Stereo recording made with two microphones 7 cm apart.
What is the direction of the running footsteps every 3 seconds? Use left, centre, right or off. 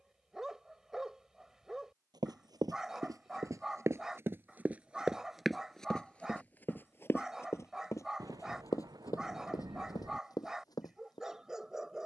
right, right, left, left.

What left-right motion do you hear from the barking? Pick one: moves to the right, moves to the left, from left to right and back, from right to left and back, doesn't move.
doesn't move.